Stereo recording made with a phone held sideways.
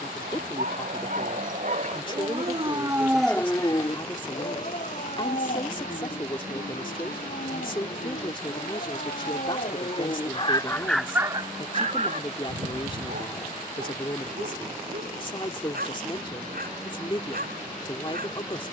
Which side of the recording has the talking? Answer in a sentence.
You can hear the talking on the left.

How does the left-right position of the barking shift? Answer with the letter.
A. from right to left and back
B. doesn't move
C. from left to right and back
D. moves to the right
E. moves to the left
A.